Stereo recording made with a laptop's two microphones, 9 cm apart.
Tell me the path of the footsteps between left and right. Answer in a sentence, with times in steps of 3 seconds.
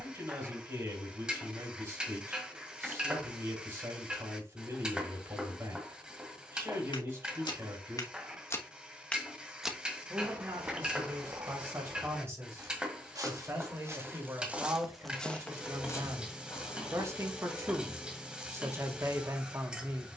In this clip you hear the footsteps not at all from 0 s, on the left from 6 s, on the right from 9 s, on the left from 15 s and not at all from 18 s.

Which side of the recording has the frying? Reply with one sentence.
You can hear the frying in the centre.